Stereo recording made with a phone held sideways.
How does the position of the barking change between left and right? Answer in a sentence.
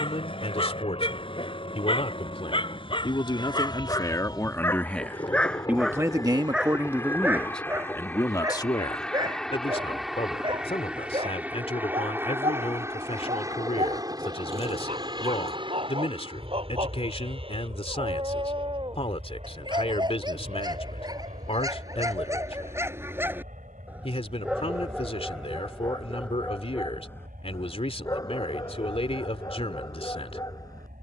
In this clip you hear the barking go right and come back.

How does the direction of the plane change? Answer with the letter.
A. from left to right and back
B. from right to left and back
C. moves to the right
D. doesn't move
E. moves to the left
C.